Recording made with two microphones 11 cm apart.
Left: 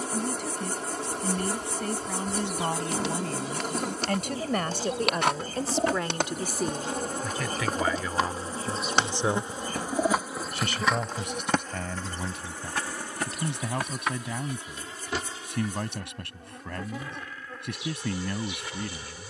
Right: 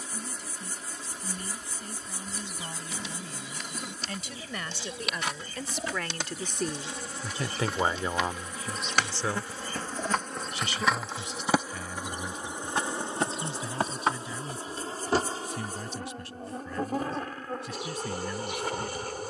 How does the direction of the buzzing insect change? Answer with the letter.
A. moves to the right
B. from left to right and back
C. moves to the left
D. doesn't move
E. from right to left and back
A.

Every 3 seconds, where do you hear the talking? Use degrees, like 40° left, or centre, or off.
70° left, 50° left, 10° right, 50° left, 70° left, 70° left, 70° left.